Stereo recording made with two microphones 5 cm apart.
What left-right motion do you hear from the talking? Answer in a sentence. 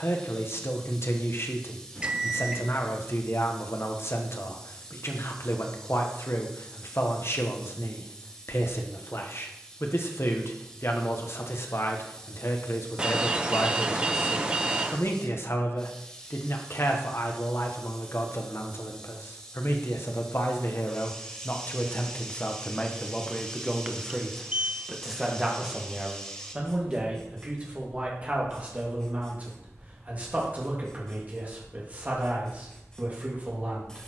In this clip you hear the talking travel towards the right.